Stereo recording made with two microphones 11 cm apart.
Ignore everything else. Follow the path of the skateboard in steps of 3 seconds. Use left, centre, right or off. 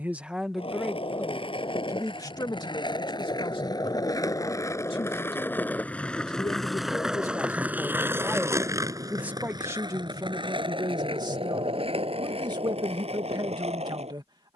left, left, centre, right, right.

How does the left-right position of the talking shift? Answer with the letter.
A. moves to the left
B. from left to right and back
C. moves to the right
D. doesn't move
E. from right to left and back
E.